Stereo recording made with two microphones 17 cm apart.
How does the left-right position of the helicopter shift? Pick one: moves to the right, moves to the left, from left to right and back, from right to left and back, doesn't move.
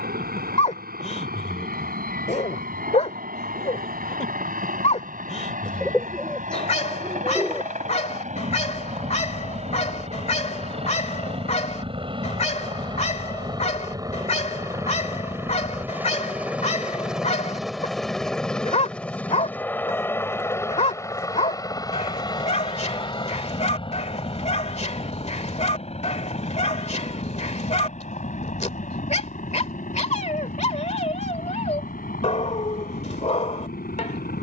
moves to the left.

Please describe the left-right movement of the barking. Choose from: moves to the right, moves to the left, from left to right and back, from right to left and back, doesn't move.
doesn't move.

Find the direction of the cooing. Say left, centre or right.
centre.